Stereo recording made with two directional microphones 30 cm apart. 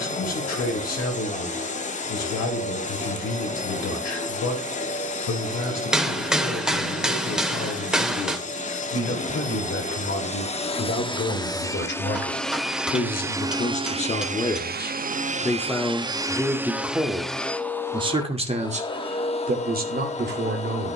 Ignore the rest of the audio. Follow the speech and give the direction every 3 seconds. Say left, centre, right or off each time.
left, left, left, left, left, centre, right.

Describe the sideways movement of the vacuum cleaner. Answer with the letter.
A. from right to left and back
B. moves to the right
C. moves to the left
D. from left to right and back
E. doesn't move
D.